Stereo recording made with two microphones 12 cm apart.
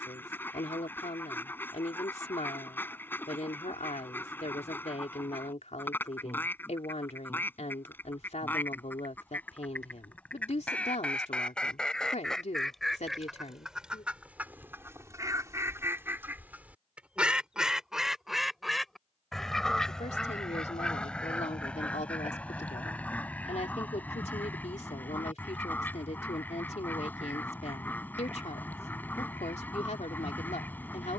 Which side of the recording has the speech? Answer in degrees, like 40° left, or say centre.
70° left.